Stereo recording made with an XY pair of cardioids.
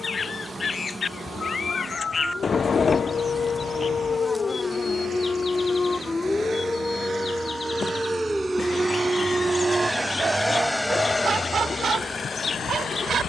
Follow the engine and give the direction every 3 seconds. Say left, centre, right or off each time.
right, right, right, centre, left.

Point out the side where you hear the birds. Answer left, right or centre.
left.